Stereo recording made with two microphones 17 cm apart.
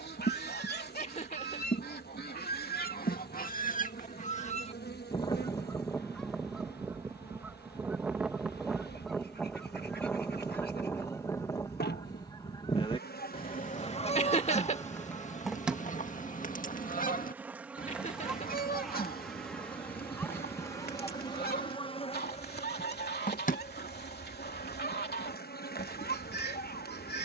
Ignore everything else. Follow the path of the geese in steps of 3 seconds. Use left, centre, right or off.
left, left, centre, centre, left, left, left, left, left.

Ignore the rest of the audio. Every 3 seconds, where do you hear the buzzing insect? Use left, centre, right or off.
left, left, left, left, left, centre, centre, left, left.